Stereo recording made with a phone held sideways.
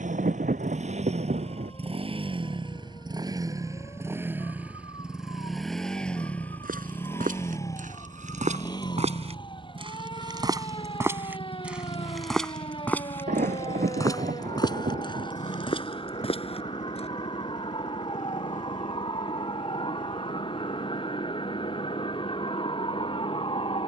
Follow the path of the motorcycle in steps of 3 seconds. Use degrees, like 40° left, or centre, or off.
40° right, 10° right, 20° left, 40° left, 40° left, 50° left, 60° left, 60° left.